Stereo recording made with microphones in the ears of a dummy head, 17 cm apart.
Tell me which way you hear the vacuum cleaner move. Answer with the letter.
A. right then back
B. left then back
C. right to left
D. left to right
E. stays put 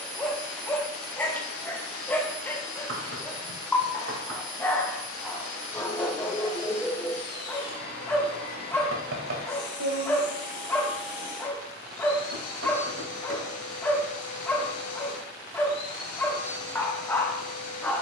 E.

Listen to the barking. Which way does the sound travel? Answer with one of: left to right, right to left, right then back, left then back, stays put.
stays put.